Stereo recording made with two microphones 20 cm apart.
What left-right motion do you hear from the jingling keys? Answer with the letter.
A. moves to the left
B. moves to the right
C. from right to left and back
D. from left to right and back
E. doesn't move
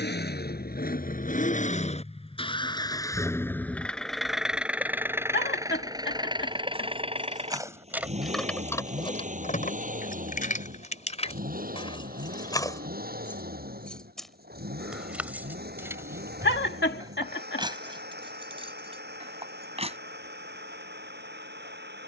C.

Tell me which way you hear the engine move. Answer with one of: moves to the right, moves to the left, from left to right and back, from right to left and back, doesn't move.
moves to the right.